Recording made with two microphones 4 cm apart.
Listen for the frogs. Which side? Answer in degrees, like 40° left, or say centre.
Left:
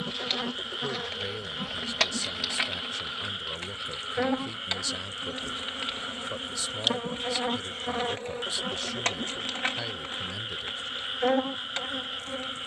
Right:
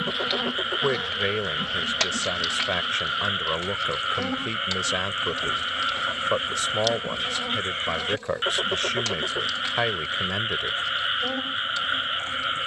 40° right.